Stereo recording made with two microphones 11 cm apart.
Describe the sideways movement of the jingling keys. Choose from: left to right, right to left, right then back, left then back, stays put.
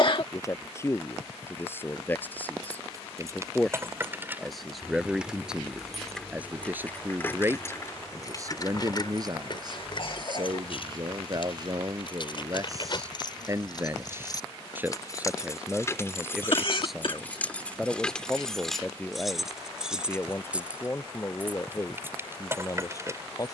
left then back.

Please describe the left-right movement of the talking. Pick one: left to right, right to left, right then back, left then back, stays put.
right then back.